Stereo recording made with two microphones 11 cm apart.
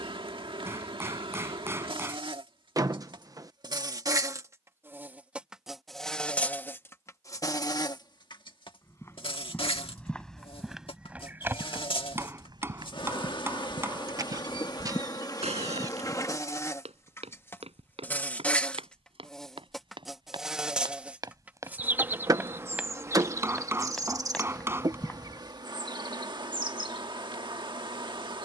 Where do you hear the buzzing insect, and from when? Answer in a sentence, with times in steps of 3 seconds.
In this clip you hear the buzzing insect on the right from 0 s, on the left from 6 s, in the centre from 18 s and on the right from 21 s.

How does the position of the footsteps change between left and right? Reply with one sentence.
You can hear the footsteps move from left to right and back again.